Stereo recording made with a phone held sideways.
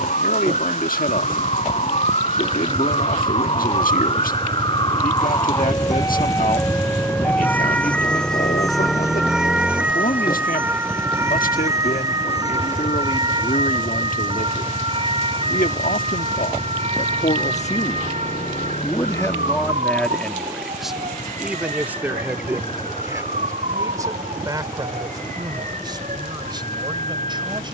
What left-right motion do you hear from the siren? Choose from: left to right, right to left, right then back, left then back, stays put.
left to right.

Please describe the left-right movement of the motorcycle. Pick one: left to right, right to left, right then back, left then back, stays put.
right to left.